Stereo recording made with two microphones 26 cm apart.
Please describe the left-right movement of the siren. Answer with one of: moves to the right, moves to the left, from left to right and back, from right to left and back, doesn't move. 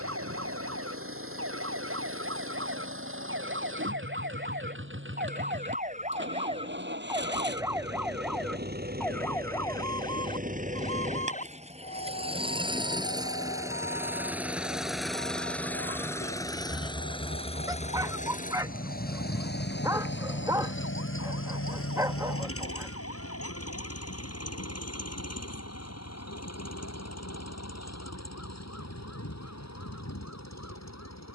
moves to the left.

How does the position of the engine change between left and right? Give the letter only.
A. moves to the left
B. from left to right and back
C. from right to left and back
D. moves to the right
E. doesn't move
A.